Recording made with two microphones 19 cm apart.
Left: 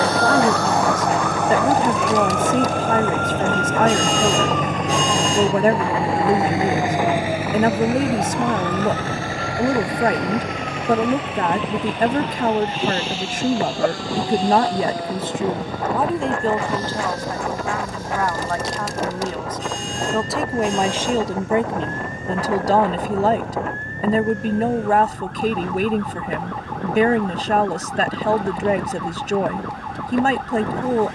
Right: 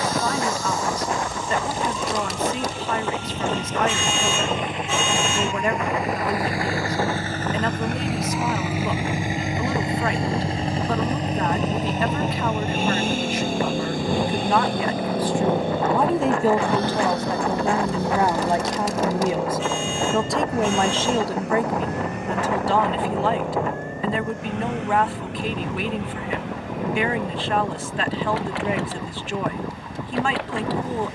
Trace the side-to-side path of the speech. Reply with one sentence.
In this clip you hear the speech move from left to right and back again.